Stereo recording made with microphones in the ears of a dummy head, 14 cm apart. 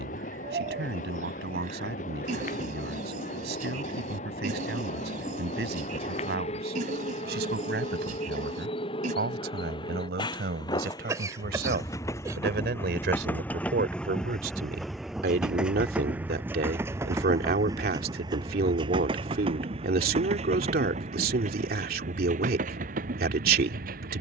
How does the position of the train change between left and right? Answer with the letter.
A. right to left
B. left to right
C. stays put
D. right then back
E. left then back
B.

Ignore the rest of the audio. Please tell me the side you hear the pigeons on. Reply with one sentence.
You can hear the pigeons on the right.